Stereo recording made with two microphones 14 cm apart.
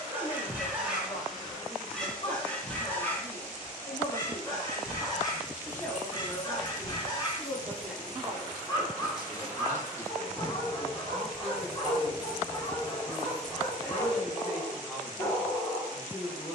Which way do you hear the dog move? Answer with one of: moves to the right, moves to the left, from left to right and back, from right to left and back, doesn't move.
moves to the left.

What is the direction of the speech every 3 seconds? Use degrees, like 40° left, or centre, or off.
40° left, 30° left, centre, 10° right, 10° right, 10° right.